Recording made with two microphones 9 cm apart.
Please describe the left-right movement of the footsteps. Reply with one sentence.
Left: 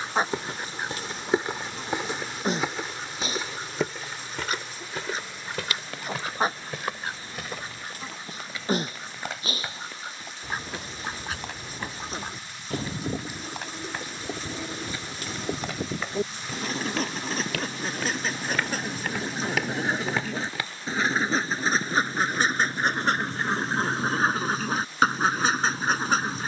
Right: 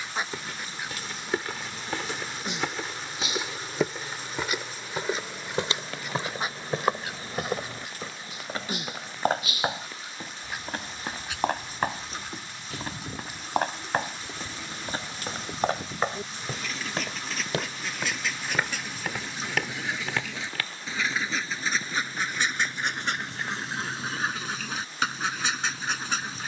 In this clip you hear the footsteps go right and come back.